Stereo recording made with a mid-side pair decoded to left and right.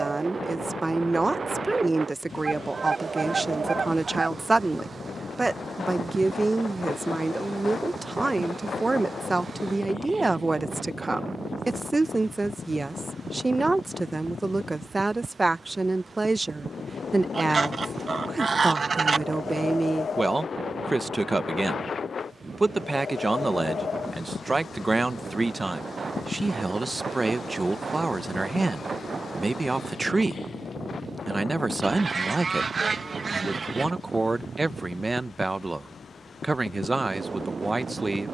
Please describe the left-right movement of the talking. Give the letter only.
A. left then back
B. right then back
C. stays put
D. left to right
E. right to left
C.